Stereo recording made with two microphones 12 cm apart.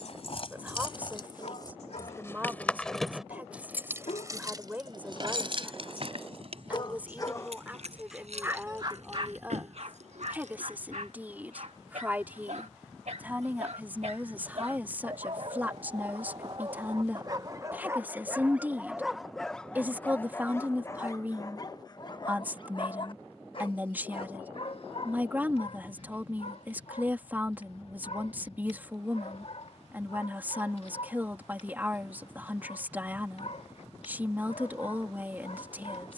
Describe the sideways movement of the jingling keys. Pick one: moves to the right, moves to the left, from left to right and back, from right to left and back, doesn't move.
moves to the right.